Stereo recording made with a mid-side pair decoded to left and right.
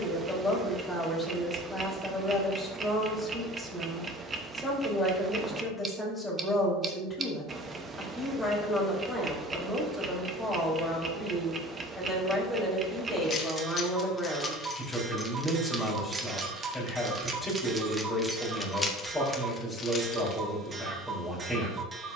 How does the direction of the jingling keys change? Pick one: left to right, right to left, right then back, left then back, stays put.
right then back.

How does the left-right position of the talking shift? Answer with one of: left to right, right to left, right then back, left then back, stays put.
stays put.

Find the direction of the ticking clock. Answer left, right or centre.
right.